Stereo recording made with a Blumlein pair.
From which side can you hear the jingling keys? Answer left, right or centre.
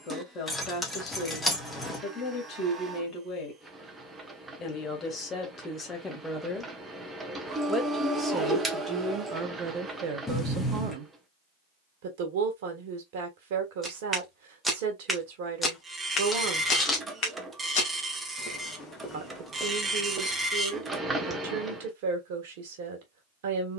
centre.